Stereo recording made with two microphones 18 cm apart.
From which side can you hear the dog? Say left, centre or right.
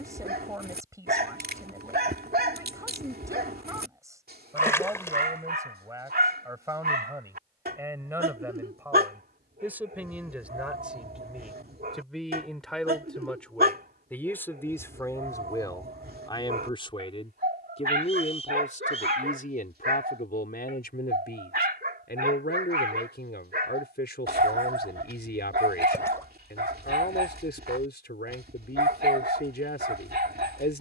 right.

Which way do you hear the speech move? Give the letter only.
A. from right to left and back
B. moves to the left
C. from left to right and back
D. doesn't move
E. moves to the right
B.